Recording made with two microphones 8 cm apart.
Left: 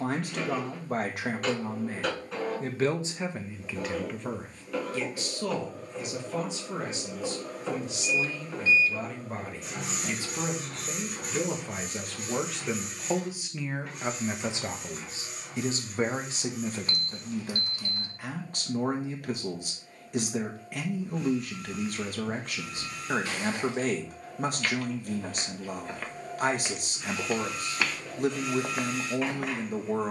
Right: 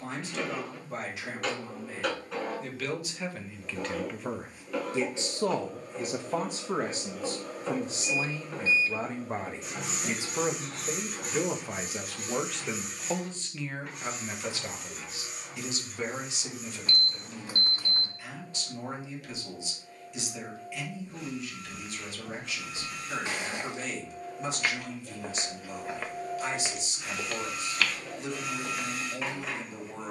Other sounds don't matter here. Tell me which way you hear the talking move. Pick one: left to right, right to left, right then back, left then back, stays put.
right then back.